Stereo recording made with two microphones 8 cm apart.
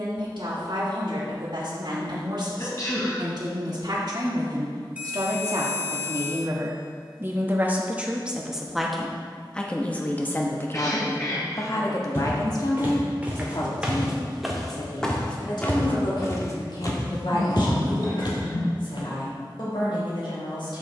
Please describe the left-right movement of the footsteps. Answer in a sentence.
You can hear the footsteps move from right to left.